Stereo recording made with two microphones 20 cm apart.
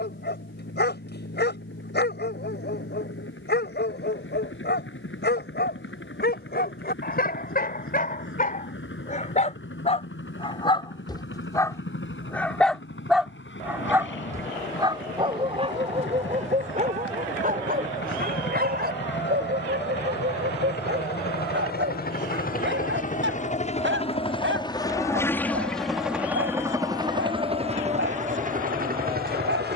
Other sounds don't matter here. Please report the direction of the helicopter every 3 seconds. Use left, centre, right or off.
left, left, left, left, left, left, left, left, centre, right.